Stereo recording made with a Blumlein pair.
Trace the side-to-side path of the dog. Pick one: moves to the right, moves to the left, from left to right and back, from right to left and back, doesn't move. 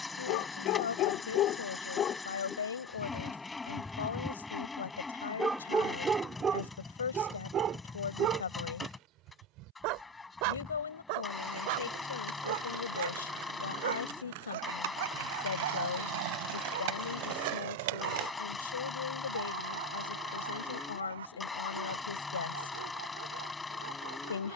moves to the right.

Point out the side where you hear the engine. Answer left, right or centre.
centre.